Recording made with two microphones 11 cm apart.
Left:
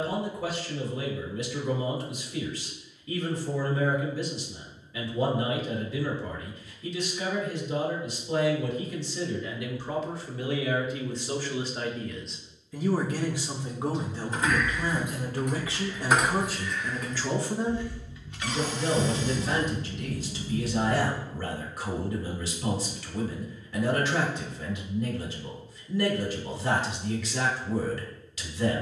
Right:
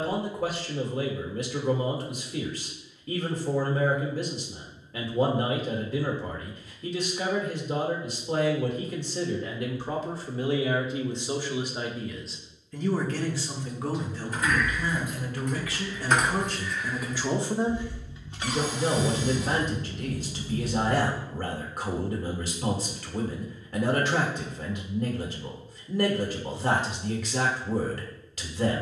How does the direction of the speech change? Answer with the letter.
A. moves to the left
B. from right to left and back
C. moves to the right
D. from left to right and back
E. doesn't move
B.